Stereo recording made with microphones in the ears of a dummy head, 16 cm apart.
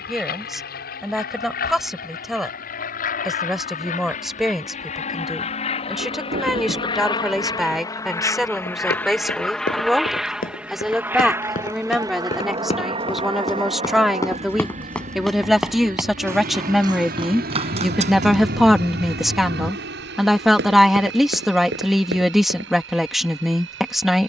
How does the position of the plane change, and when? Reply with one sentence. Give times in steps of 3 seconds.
In this clip you hear the plane on the left from 0 s, in the centre from 9 s and on the right from 12 s.